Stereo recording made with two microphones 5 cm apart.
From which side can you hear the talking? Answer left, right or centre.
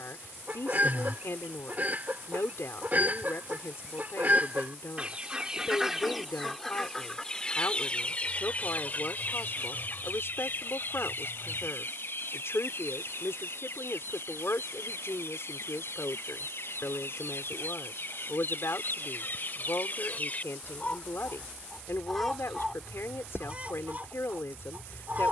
left.